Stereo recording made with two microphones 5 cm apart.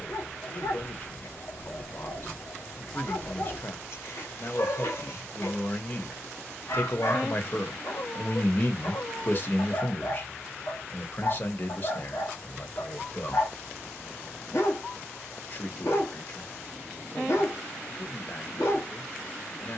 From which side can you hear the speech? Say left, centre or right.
left.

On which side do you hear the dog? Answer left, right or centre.
left.